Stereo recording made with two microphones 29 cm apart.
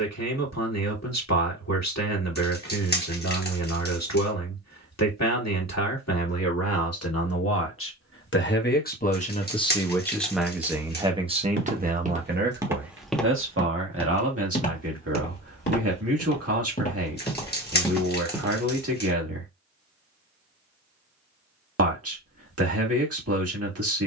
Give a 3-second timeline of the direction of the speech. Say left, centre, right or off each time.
left, left, left, centre, right, right, right, right.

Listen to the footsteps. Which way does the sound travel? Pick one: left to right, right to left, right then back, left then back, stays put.
left then back.